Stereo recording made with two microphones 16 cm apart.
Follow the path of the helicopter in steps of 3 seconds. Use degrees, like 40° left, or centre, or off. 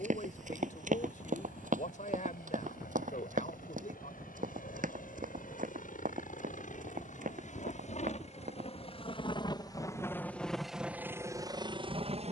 70° left, 70° left, 50° left, centre.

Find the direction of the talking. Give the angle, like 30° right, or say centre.
50° left.